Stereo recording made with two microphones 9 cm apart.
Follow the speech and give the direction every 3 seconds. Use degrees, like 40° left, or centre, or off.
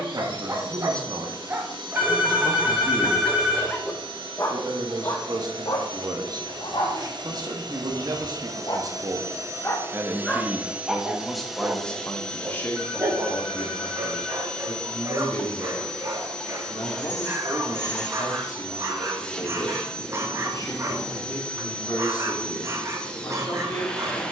50° right, 50° right, 50° right, 10° right, 30° left, 40° left, 40° left, 40° left.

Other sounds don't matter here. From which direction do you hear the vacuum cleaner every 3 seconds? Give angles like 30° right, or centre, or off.
70° right, 70° right, 60° right, 20° right, 10° left, 10° left, 10° left, 10° left.